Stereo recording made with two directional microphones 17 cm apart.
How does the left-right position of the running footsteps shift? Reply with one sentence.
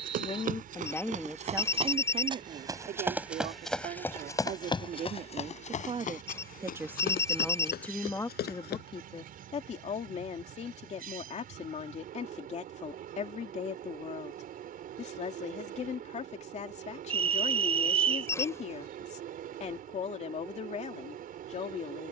You can hear the running footsteps move to the left.